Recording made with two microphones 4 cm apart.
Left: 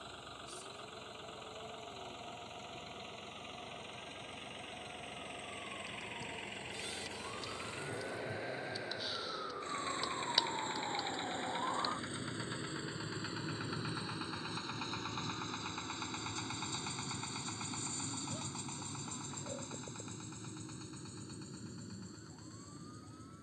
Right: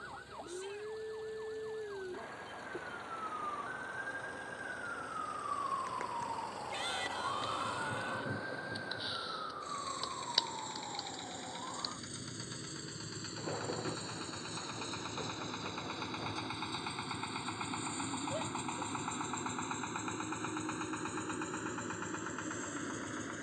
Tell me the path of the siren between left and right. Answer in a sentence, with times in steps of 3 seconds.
You can hear the siren on the right from 0 s, in the centre from 9 s and on the left from 12 s.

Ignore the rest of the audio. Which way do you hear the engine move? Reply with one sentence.
You can hear the engine go from the left side to the right.